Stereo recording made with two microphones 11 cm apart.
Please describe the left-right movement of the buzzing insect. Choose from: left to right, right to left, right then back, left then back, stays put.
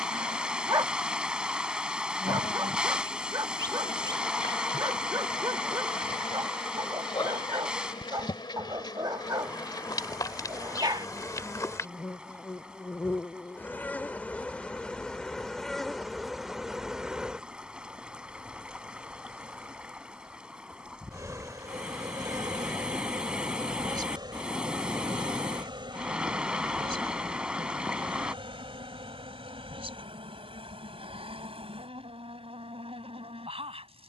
left to right.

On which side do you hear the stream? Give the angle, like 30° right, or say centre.
10° right.